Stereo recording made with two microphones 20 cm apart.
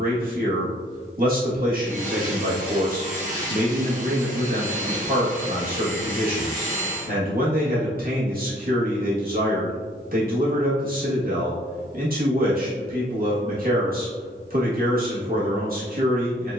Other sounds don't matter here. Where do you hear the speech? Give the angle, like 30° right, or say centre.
50° right.